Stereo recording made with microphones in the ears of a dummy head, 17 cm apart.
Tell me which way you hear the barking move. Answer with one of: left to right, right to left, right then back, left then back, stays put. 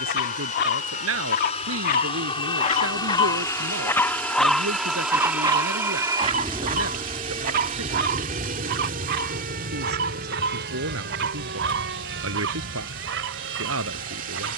left to right.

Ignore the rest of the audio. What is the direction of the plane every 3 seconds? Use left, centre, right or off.
left, centre, right, right, right.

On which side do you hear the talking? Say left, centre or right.
right.